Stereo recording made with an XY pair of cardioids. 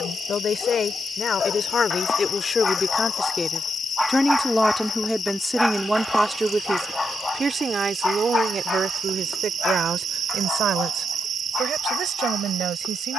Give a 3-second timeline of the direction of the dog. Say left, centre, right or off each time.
left, centre, left, left, left.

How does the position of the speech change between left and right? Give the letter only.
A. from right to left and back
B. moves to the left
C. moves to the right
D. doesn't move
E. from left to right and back
C.